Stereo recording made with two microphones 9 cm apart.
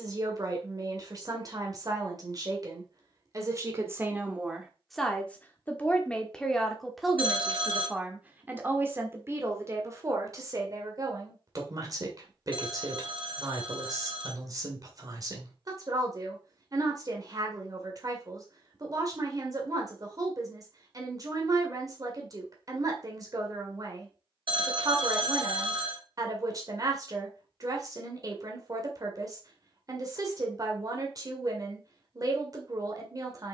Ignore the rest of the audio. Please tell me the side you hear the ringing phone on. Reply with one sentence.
In this clip you hear the ringing phone on the right.